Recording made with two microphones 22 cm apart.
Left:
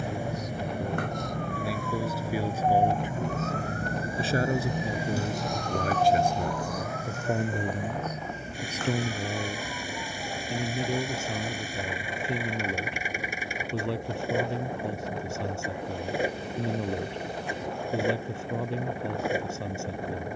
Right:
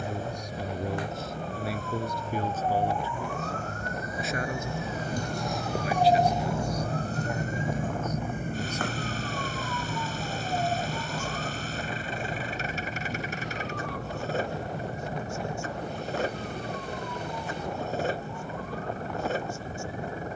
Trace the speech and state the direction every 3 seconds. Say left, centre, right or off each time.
centre, left, left, left, left, left, left.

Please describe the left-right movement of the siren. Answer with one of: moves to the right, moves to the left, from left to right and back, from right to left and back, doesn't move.
moves to the right.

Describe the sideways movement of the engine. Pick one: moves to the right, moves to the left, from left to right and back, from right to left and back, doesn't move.
doesn't move.